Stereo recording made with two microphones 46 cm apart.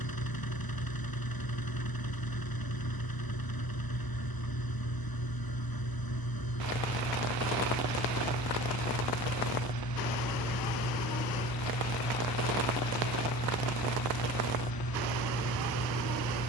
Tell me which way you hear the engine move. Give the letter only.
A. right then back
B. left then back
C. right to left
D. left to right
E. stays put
E.